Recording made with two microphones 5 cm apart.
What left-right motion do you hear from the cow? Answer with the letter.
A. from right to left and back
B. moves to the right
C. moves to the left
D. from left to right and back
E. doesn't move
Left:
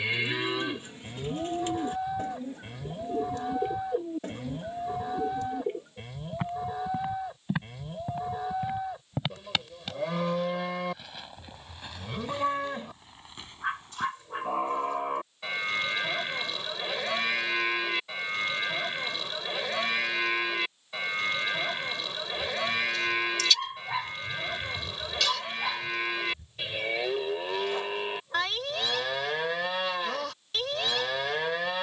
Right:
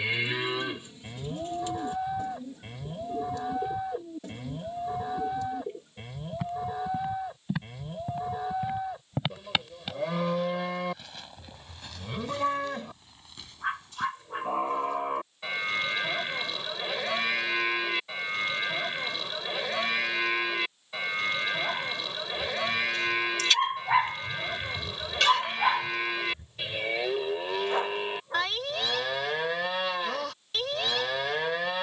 E.